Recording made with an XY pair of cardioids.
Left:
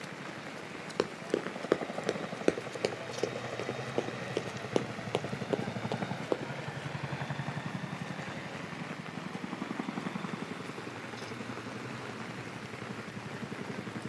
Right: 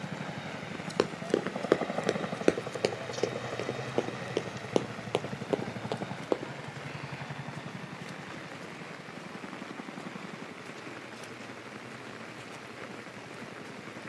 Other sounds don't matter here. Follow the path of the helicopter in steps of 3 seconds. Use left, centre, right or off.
right, centre, left, left, left.